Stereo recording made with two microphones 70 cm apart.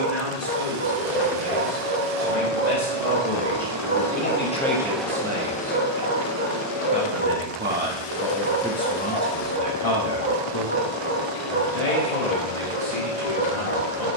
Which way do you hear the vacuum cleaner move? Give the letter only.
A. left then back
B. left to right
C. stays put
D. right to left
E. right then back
D.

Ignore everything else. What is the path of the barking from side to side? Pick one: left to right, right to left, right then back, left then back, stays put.
stays put.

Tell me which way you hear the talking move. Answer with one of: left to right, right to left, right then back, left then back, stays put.
right then back.